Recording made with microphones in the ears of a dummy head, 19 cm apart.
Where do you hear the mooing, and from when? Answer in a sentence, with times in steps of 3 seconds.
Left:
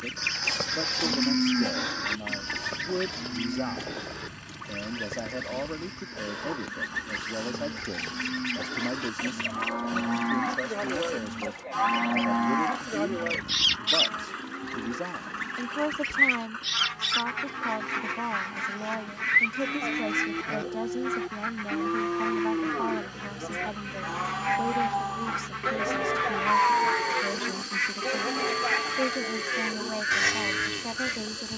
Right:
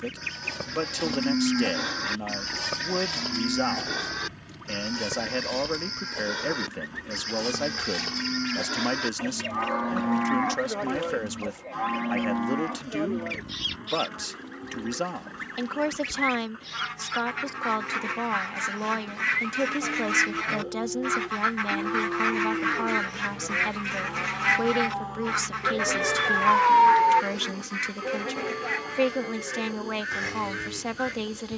You can hear the mooing in the centre from 0 s, on the right from 3 s, in the centre from 9 s and on the left from 12 s.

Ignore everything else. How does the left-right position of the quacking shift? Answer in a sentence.
In this clip you hear the quacking go right and come back.